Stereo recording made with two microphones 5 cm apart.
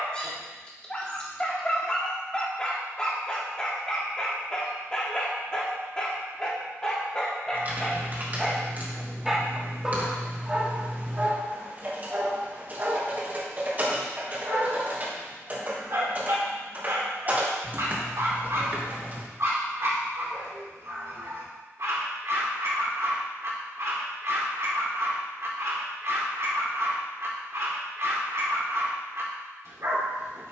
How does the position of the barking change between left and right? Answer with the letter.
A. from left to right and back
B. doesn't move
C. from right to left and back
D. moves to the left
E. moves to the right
E.